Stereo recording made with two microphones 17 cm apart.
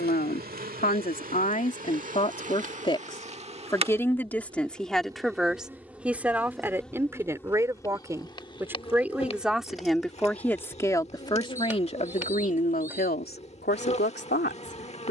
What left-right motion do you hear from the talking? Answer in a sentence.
You can hear the talking go right and come back.